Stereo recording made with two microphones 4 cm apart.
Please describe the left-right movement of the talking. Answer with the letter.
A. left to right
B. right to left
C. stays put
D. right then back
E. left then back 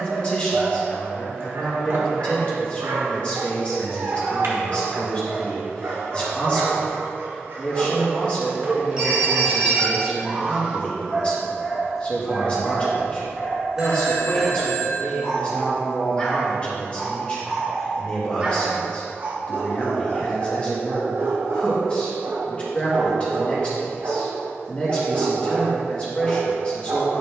C.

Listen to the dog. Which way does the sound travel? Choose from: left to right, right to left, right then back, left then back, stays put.
left then back.